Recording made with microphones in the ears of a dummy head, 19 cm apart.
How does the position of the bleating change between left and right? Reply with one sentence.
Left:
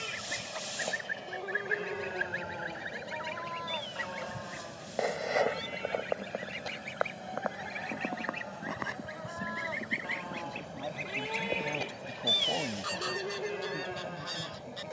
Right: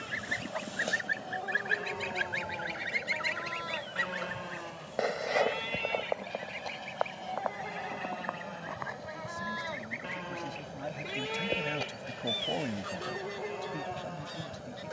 In this clip you hear the bleating go right and come back.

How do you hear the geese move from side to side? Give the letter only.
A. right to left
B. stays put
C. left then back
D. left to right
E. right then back
A.